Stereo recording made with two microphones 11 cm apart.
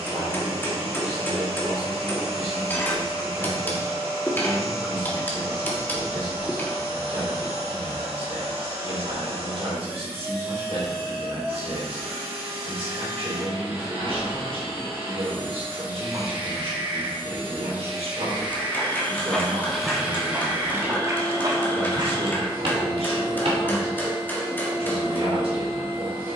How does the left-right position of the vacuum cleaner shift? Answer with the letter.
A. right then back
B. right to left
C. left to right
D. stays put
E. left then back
D.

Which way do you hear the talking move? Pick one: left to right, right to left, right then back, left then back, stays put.
stays put.